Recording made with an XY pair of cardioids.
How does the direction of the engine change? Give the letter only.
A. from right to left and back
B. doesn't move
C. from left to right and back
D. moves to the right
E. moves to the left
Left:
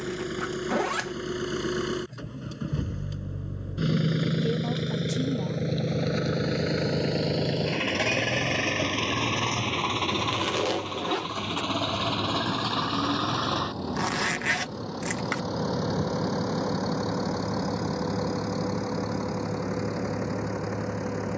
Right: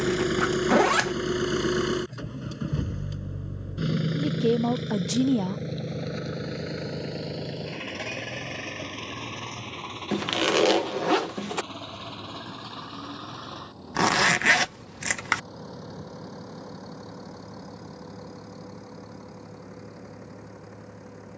E.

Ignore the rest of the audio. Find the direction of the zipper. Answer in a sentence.
You can hear the zipper on the right.